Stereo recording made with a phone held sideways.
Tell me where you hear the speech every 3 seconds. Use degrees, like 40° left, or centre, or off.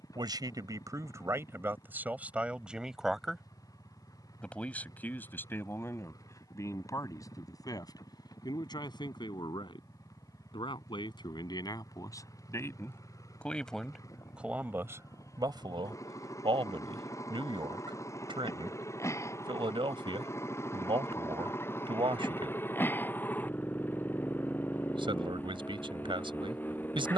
20° right, 10° left, 20° left, 30° left, centre, 30° right, 40° right, 40° right, 40° right.